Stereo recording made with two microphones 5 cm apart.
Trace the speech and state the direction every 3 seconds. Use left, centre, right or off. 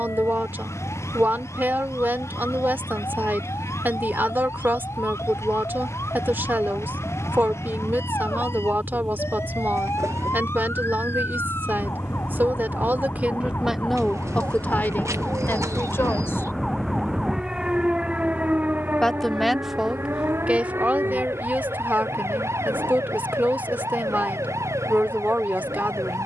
right, right, right, right, centre, left, centre, right, right.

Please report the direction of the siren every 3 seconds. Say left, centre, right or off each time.
left, left, left, left, left, centre, right, right, right.